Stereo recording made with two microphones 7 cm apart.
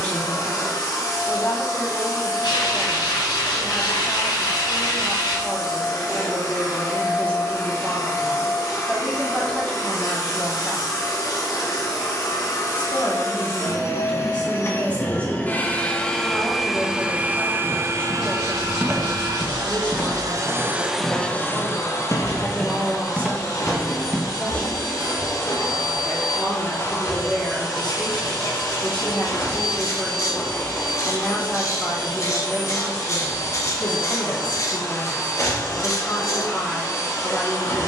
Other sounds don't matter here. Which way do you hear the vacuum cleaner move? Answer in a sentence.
You can hear the vacuum cleaner move from left to right and back again.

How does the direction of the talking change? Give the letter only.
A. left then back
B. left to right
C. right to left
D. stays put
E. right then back
D.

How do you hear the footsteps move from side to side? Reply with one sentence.
In this clip you hear the footsteps move from right to left and back again.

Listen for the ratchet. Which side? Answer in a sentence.
You can hear the ratchet on the left.